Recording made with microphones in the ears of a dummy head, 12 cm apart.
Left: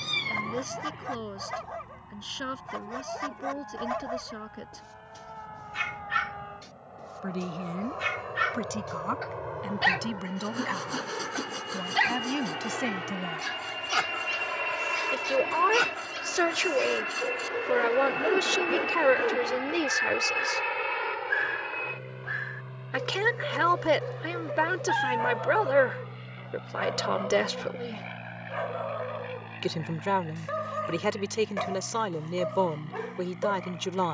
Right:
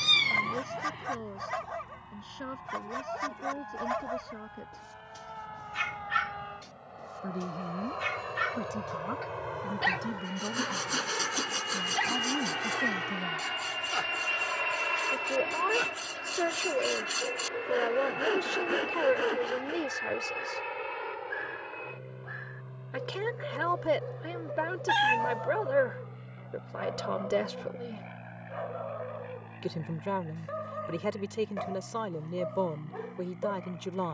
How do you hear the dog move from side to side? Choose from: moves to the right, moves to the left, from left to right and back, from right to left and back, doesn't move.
moves to the left.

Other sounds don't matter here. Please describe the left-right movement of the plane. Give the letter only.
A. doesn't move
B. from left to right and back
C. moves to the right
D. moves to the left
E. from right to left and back
D.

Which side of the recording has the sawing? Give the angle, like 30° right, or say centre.
50° right.